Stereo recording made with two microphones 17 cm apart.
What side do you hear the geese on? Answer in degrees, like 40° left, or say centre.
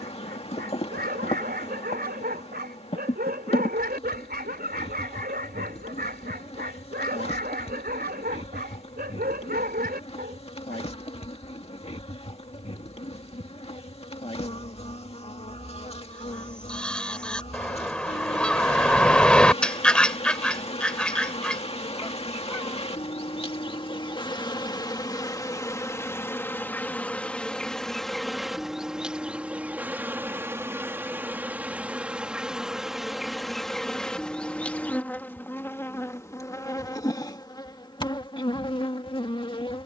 10° left.